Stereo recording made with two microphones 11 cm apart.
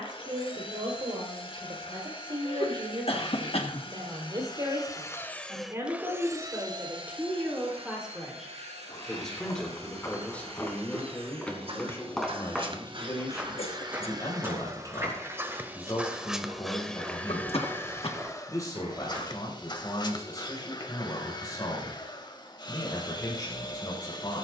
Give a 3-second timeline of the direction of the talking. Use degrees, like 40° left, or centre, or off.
50° right, 40° right, 10° right, 10° left, 30° left, 30° left, 30° left, 30° left.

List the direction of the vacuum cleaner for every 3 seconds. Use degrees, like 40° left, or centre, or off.
50° left, 30° left, 50° right, 60° right, 40° right, centre, 40° left, 40° left.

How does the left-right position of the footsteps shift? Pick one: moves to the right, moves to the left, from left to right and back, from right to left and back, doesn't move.
moves to the right.